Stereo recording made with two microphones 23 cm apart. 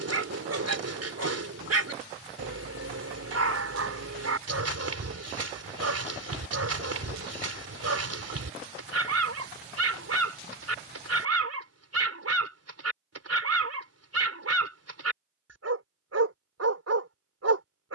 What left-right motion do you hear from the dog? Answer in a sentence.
In this clip you hear the dog stay put.